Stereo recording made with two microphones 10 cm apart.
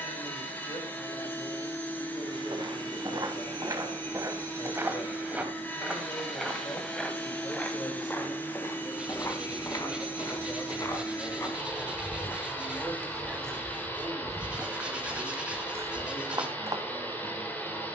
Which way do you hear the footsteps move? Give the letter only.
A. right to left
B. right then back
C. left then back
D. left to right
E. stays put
C.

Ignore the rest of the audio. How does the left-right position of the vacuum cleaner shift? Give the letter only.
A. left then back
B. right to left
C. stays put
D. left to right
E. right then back
C.